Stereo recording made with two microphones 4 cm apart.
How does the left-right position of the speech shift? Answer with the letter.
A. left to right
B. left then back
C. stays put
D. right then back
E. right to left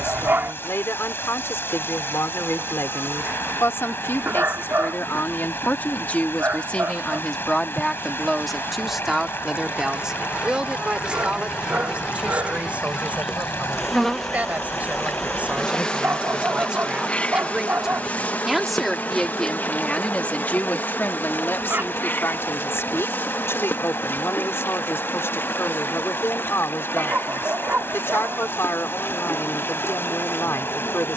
D.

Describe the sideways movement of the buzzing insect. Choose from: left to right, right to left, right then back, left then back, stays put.
right to left.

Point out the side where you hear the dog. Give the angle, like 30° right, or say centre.
60° right.